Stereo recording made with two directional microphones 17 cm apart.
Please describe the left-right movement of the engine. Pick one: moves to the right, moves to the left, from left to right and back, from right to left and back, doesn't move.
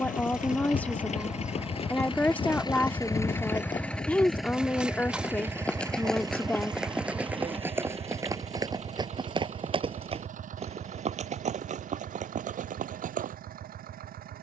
moves to the right.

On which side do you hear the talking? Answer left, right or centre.
centre.